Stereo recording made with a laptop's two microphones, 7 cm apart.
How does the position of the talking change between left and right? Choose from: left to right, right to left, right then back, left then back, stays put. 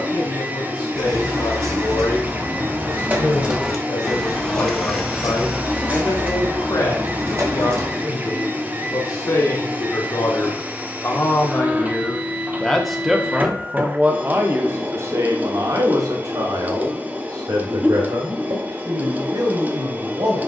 left to right.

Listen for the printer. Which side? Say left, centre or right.
right.